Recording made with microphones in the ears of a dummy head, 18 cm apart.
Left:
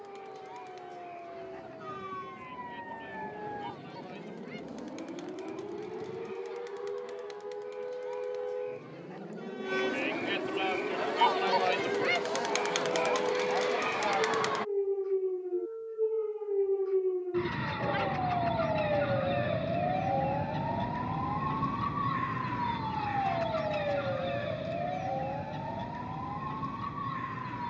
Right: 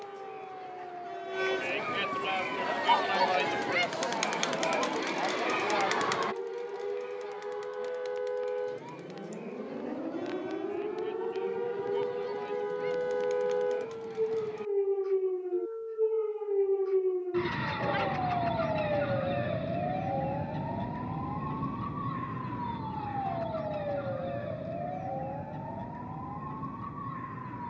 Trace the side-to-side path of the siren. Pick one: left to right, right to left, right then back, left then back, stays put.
right to left.